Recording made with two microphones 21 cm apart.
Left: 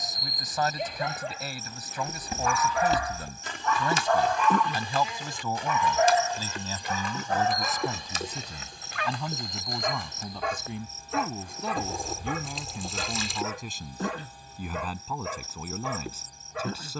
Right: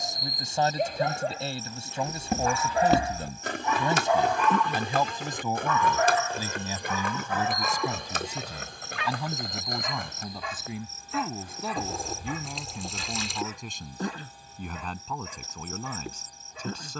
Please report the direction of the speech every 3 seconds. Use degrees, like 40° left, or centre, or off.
30° right, 20° right, 10° right, centre, centre, 10° left.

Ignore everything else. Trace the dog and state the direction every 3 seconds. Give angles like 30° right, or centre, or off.
40° right, centre, 40° left, 60° left, 70° left, 70° left.